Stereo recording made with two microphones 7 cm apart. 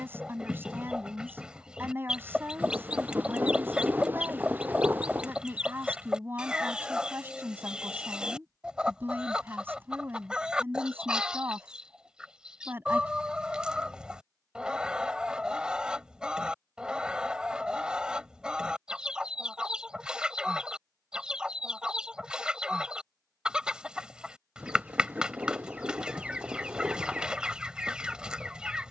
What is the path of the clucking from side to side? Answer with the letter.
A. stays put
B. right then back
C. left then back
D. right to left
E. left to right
A.